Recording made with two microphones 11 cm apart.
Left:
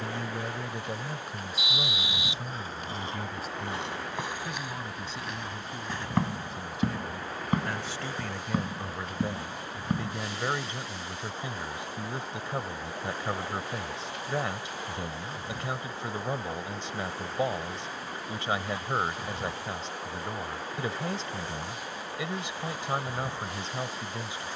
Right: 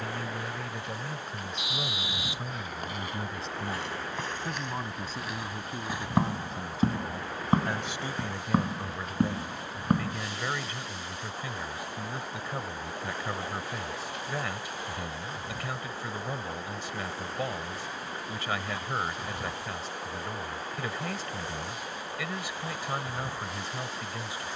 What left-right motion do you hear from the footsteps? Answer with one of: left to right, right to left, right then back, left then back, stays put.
left to right.